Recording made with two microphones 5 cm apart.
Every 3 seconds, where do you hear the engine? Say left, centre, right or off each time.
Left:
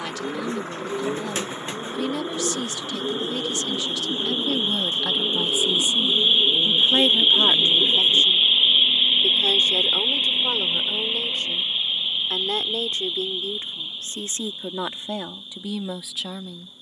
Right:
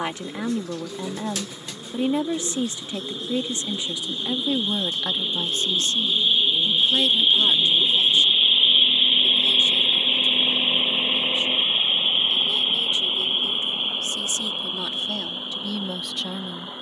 left, left, centre, right, right, right.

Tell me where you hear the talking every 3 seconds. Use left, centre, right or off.
right, centre, left, left, left, centre.